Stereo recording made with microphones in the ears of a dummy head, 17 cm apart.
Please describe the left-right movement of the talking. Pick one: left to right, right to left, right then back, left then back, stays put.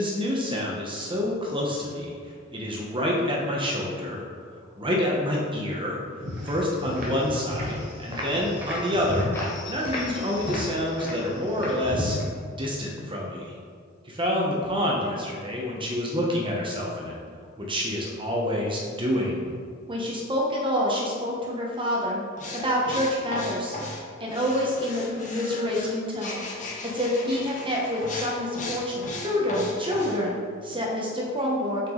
stays put.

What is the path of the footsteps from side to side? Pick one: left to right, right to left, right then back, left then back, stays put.
right to left.